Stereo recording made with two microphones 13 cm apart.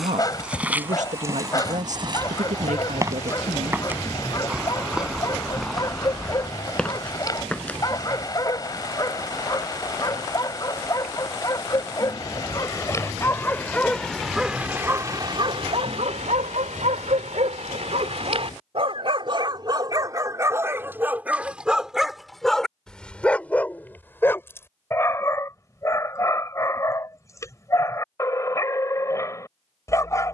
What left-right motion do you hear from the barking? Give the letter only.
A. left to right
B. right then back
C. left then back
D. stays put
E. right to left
B.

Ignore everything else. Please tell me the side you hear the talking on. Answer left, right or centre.
right.